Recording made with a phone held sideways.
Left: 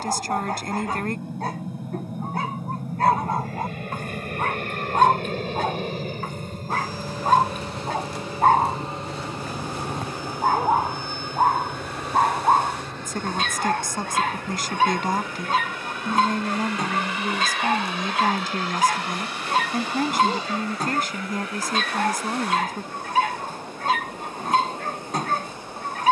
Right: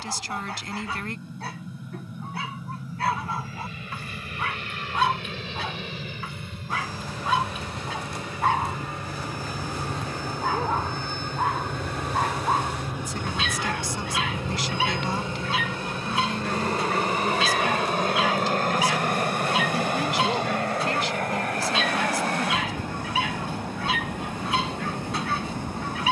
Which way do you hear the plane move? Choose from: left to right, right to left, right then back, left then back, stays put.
left to right.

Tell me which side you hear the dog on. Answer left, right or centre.
left.